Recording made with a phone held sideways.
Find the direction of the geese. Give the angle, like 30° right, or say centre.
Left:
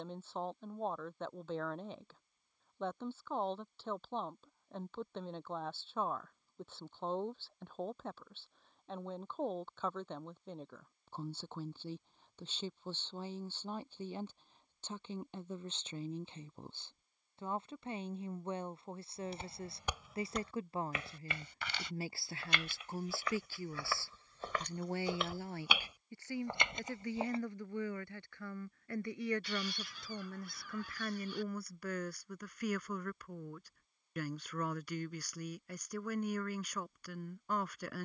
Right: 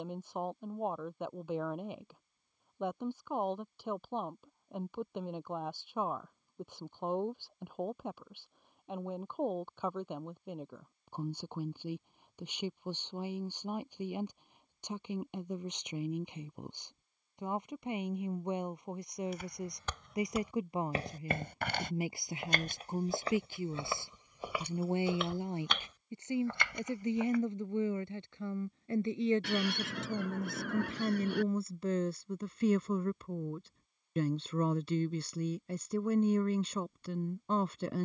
70° right.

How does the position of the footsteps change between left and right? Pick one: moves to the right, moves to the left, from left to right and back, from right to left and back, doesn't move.
from left to right and back.